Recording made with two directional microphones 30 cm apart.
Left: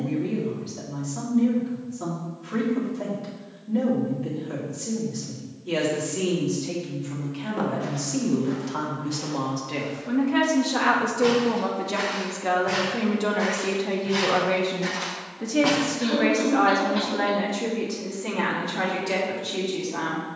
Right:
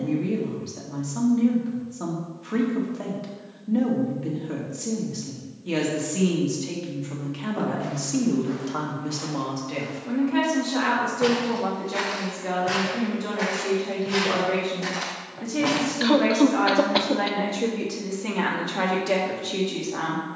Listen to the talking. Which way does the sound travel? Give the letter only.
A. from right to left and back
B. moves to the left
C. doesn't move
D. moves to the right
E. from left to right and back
A.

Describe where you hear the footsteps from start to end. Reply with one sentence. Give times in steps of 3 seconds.
In this clip you hear the footsteps not at all from 0 s, in the centre from 6 s, on the right from 9 s, in the centre from 15 s and not at all from 18 s.